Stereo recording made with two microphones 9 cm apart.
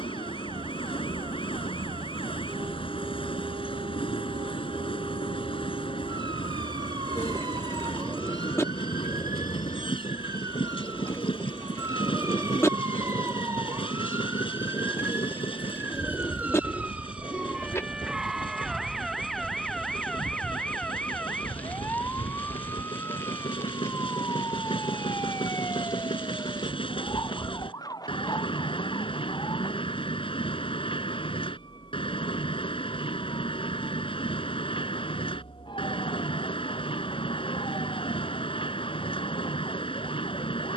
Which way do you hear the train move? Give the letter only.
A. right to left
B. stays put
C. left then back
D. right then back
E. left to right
B.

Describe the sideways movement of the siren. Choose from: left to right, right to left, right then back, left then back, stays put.
right to left.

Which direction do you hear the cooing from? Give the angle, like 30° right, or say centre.
30° left.